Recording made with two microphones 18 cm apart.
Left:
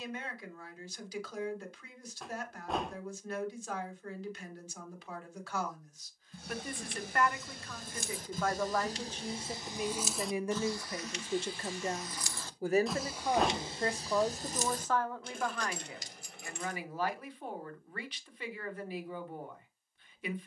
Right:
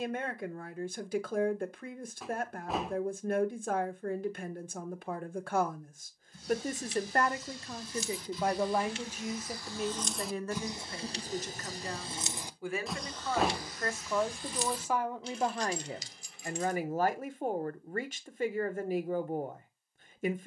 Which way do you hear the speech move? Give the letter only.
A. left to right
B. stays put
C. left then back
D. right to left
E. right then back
C.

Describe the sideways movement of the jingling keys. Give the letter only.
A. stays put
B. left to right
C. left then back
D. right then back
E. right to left
D.